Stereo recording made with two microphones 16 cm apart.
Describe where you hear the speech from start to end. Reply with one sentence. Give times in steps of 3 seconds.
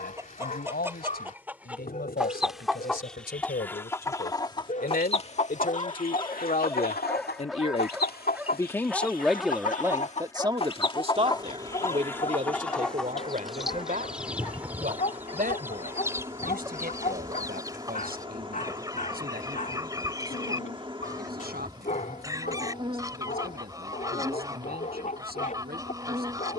In this clip you hear the speech on the left from 0 s and on the right from 9 s.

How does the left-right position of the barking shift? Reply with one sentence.
You can hear the barking move from left to right and back again.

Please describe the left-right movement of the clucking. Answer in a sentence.
In this clip you hear the clucking go left and come back.